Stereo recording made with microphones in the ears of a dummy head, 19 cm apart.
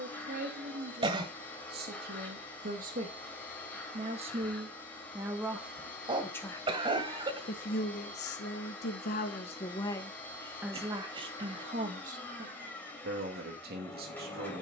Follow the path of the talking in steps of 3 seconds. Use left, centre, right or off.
right, right, left, centre, right.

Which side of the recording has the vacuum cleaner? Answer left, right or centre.
centre.